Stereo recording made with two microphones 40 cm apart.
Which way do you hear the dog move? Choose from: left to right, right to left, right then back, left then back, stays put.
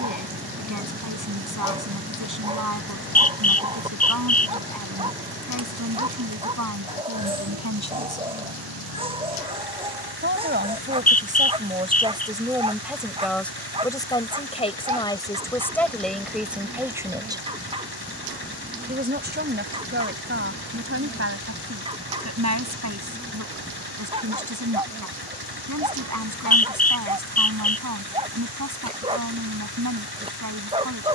stays put.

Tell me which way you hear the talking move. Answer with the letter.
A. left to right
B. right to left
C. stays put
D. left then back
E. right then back
D.